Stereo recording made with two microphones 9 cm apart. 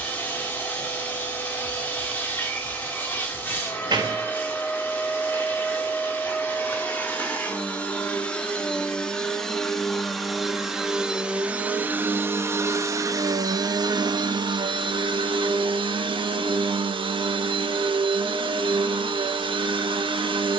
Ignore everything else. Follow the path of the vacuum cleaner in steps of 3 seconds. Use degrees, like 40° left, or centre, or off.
20° left, 20° left, 20° left, centre, 50° right, 80° right, 80° right.